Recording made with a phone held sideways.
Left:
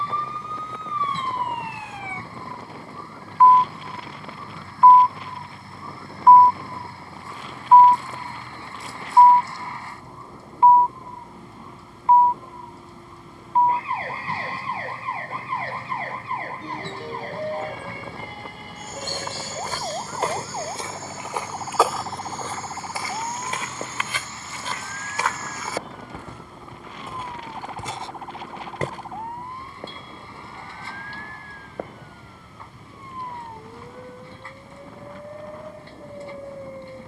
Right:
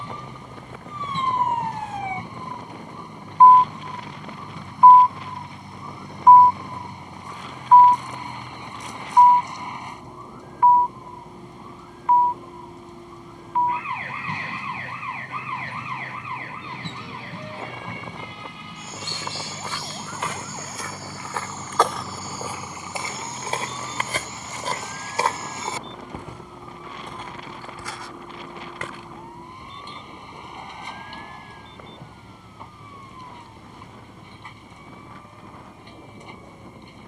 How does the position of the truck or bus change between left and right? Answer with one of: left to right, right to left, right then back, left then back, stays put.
stays put.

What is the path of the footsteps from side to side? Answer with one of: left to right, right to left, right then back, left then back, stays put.
right then back.